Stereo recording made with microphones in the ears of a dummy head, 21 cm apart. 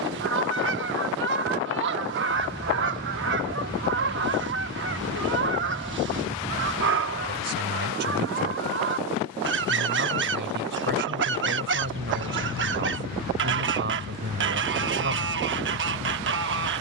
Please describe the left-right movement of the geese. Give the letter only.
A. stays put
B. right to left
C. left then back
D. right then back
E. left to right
A.